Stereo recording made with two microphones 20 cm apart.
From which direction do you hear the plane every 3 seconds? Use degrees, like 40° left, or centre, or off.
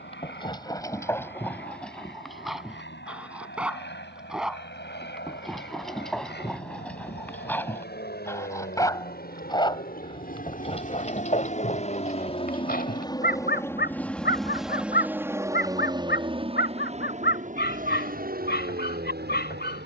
70° left, 70° left, 60° left, 50° left, 10° left, 30° right, 50° right.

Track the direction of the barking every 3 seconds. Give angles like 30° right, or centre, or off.
10° left, centre, 10° left, 30° left, 50° left, 60° left, 60° left.